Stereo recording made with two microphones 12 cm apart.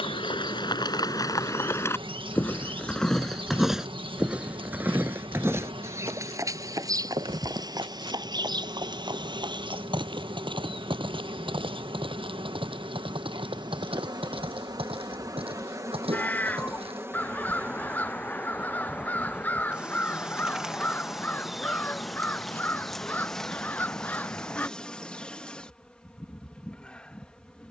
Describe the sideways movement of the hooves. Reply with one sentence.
You can hear the hooves move to the right.